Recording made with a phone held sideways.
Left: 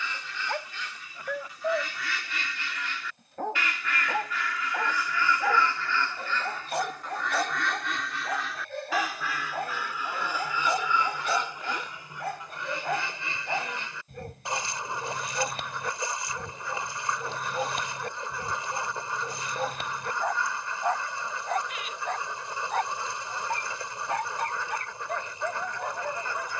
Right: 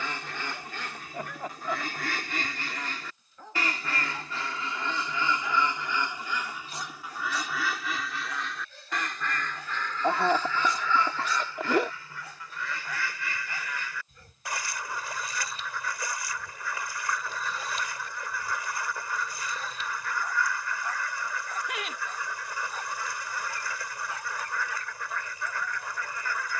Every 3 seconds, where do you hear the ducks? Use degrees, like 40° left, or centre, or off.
50° right, 30° right, 10° right, 10° left, 20° left, 20° left, 20° left, 20° left, 20° left.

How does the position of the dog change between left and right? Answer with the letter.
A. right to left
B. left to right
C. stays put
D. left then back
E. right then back
C.